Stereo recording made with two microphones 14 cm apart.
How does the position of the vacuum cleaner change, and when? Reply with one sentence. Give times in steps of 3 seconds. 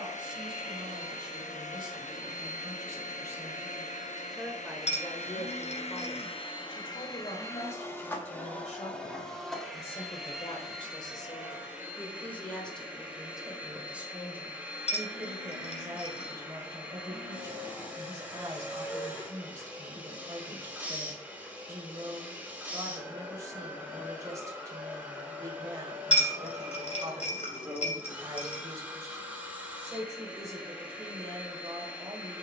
In this clip you hear the vacuum cleaner on the left from 0 s and in the centre from 9 s.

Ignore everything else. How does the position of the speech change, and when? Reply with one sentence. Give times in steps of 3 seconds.
You can hear the speech on the right from 0 s, in the centre from 3 s, on the left from 6 s, in the centre from 12 s and on the right from 15 s.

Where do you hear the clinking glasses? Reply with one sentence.
You can hear the clinking glasses on the left.